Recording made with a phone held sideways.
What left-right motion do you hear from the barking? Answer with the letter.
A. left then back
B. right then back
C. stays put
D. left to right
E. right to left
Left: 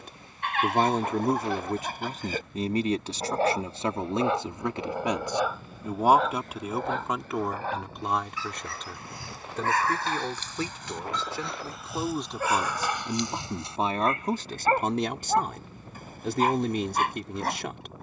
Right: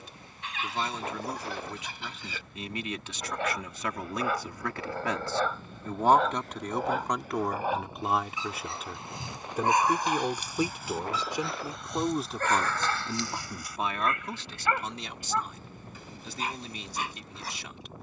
B.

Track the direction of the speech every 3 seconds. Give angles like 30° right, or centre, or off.
50° left, 30° left, centre, 10° right, 30° left, 60° left.